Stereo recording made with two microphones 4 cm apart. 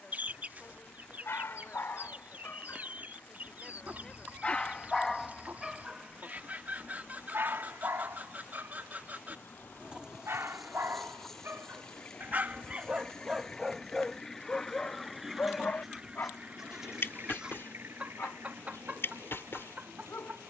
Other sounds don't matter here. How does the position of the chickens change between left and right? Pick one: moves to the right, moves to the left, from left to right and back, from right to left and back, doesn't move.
from right to left and back.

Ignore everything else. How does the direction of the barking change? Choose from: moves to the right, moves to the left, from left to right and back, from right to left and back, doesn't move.
from left to right and back.